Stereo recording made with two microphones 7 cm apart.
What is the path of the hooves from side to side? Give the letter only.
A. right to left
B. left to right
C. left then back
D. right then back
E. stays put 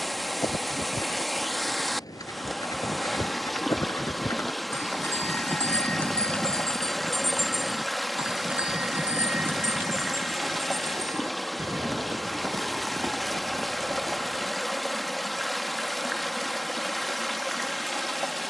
B.